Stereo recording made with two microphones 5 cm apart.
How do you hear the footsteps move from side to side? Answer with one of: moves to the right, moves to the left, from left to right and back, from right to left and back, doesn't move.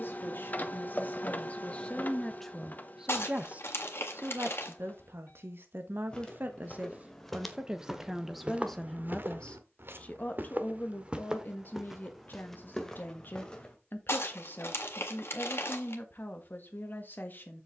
from left to right and back.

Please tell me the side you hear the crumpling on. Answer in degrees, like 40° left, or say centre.
60° left.